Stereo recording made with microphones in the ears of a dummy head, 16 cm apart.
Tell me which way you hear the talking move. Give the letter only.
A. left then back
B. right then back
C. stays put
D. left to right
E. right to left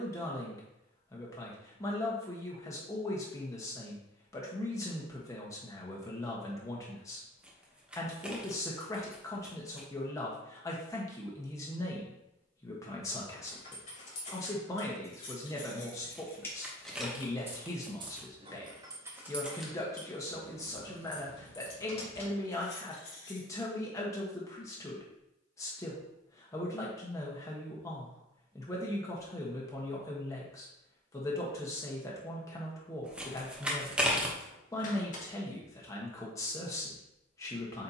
C.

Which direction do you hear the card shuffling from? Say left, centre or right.
centre.